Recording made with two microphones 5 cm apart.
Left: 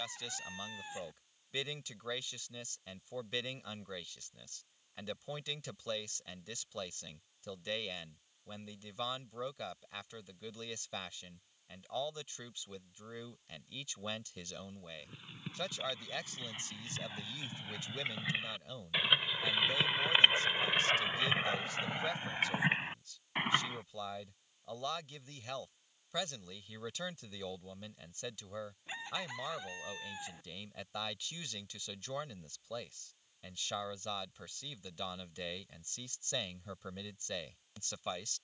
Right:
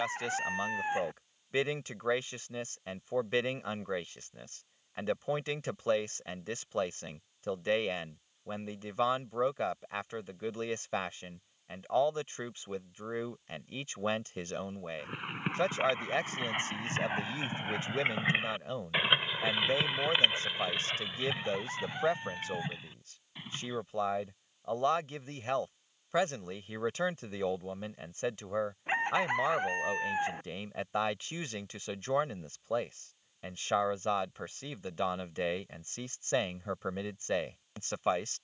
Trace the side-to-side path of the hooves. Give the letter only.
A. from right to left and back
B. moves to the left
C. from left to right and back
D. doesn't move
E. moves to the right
B.